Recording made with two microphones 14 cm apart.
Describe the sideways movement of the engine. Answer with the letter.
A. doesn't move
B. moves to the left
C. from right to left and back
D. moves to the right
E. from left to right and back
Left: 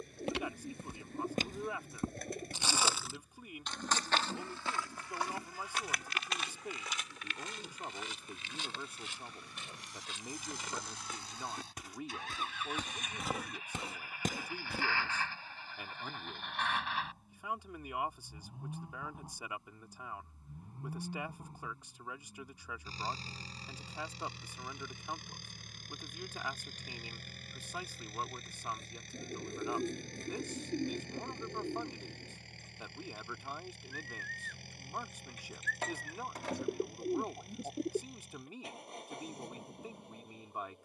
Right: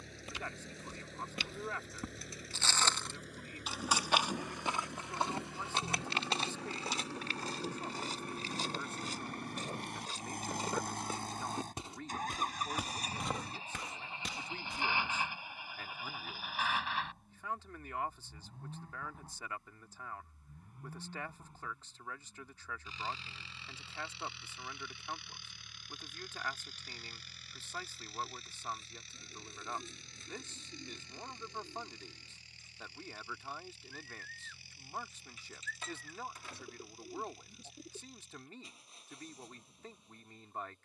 B.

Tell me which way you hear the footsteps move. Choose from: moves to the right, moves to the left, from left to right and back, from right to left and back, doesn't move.
from left to right and back.